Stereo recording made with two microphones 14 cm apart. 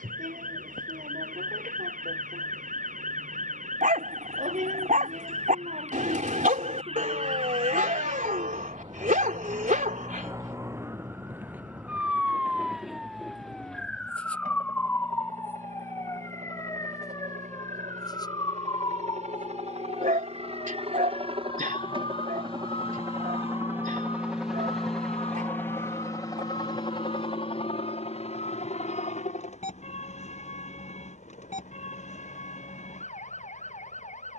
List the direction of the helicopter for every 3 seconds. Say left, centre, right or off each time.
right, right, right, right, right, right, right, right, centre, left, left, left.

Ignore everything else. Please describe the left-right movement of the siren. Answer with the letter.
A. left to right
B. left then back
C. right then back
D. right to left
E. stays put
D.